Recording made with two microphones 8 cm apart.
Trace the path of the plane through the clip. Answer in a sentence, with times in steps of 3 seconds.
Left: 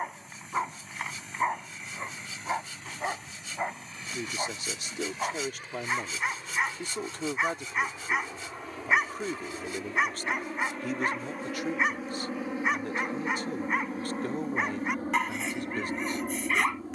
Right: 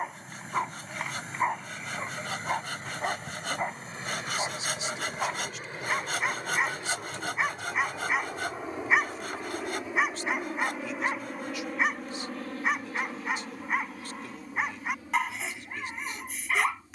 You can hear the plane on the right from 0 s, in the centre from 9 s and on the left from 12 s.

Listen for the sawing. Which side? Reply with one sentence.
You can hear the sawing on the right.